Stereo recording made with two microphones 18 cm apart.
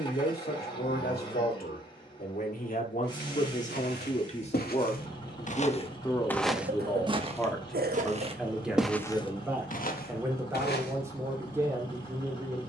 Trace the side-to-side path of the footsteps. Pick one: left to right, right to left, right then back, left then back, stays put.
right then back.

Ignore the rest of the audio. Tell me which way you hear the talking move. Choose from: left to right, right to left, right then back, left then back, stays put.
left to right.